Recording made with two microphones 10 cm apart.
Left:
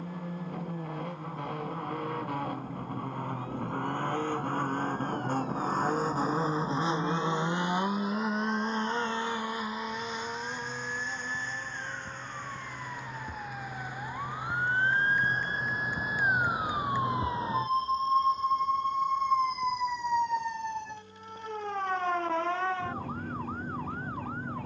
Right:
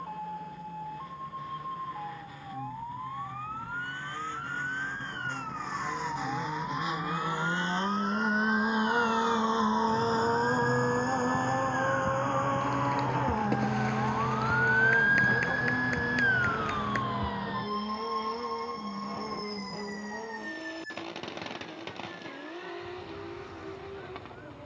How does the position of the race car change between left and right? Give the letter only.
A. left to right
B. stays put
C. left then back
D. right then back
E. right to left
A.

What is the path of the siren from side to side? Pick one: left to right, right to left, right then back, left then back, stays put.
right to left.